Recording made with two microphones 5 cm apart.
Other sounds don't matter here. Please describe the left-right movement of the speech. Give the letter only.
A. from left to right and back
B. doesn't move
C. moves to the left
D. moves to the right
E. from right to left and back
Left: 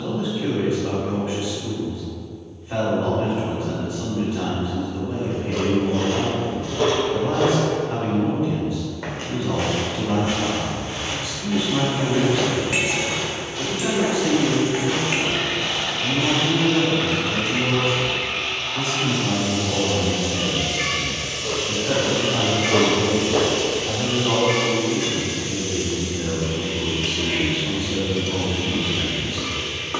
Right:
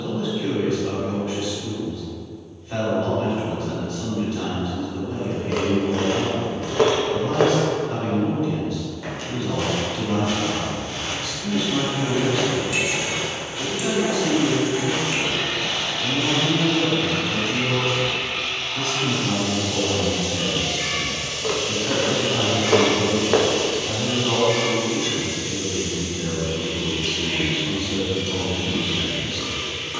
B.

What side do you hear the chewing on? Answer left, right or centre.
right.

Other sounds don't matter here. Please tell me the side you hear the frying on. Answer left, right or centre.
left.